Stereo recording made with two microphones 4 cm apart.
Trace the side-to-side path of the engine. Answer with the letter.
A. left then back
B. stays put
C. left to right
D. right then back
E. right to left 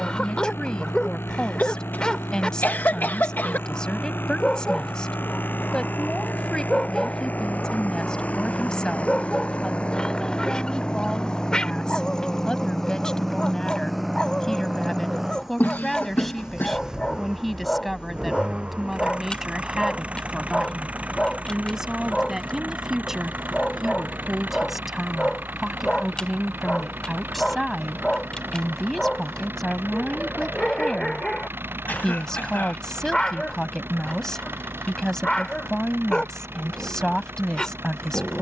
C.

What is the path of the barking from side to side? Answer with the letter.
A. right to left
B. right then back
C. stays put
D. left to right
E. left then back
C.